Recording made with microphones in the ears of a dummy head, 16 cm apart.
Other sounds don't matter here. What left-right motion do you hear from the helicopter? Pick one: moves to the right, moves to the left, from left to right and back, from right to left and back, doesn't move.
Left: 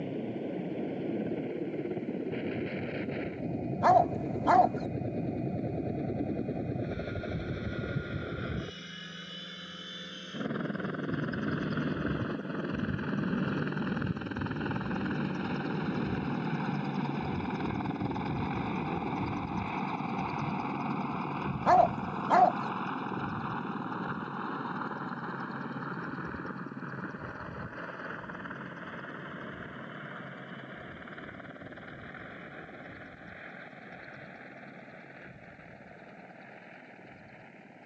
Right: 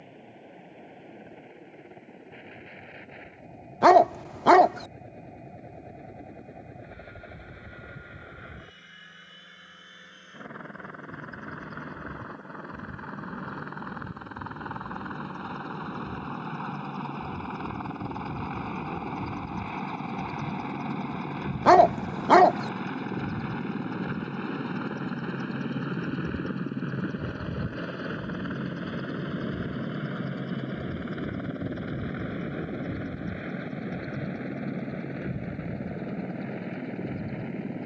moves to the right.